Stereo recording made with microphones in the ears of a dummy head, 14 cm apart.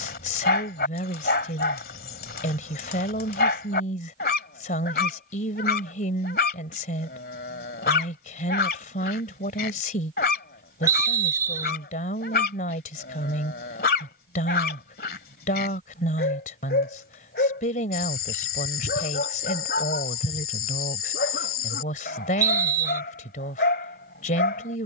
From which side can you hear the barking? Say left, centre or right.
left.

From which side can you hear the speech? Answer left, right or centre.
left.